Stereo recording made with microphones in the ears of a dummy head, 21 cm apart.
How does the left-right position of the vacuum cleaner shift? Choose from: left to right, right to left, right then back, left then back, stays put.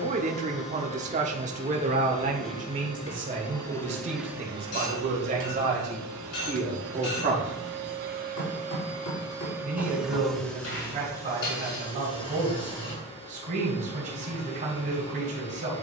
right then back.